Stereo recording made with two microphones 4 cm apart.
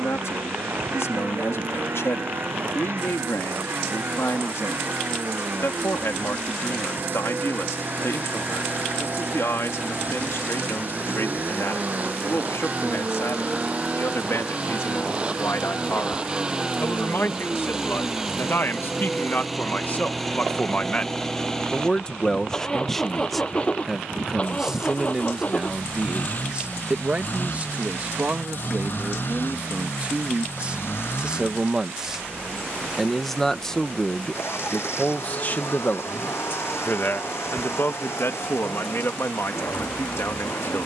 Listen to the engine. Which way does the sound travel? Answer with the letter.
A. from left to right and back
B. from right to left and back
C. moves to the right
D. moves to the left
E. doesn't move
D.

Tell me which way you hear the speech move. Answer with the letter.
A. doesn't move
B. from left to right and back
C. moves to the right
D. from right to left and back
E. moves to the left
B.